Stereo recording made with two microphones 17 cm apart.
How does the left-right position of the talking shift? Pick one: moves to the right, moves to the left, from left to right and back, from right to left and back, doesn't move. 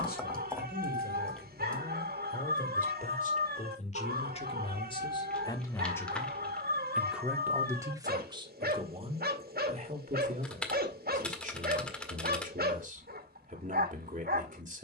moves to the right.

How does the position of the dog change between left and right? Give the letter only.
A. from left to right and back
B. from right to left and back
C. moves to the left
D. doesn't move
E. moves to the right
D.